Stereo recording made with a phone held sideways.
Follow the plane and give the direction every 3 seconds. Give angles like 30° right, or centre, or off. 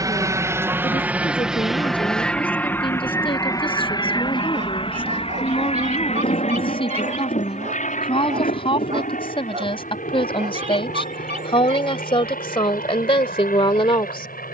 centre, 30° left, 60° left, 70° left, 70° left.